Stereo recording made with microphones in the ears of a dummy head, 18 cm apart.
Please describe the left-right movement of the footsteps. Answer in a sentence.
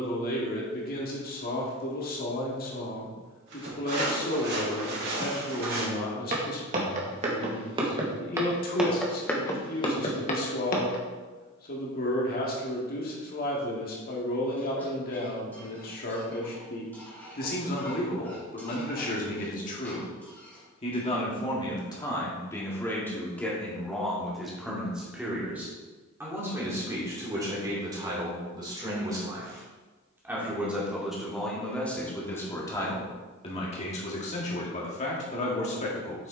You can hear the footsteps move from right to left.